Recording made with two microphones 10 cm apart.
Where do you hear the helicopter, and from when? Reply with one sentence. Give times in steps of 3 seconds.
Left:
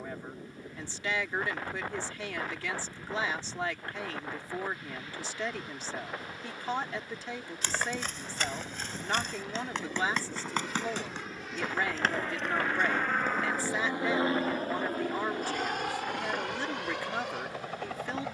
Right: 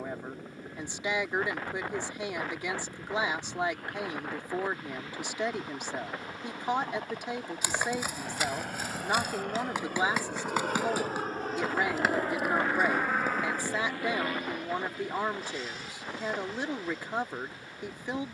You can hear the helicopter on the right from 0 s, in the centre from 12 s and on the left from 15 s.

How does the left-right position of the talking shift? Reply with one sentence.
In this clip you hear the talking stay put.